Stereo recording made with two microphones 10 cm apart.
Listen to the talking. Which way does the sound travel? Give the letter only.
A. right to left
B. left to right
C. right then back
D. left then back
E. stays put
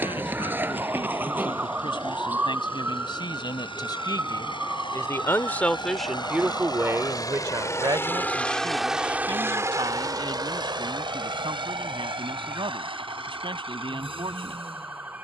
B.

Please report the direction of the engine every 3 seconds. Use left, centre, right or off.
left, left, left, right, right.